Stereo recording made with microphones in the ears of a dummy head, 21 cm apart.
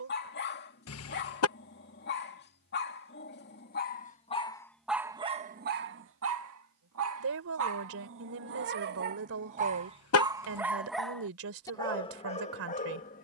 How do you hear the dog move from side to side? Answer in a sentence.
You can hear the dog move from left to right and back again.